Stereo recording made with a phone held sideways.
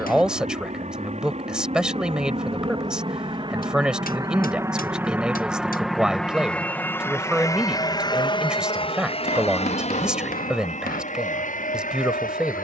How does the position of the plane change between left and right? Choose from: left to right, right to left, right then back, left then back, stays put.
right to left.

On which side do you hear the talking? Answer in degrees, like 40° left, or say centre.
centre.